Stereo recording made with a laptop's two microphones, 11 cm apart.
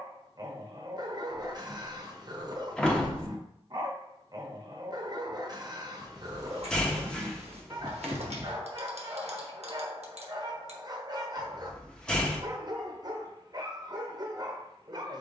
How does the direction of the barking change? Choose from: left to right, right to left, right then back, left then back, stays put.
stays put.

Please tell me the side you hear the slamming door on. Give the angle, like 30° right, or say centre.
10° left.